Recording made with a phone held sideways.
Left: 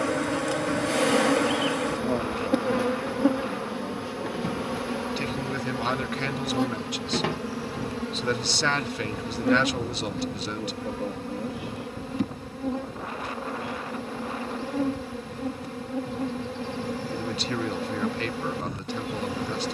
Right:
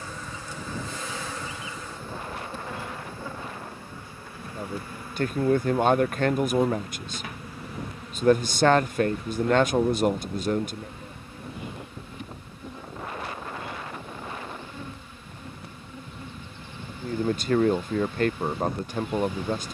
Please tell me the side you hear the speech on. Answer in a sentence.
In this clip you hear the speech on the right.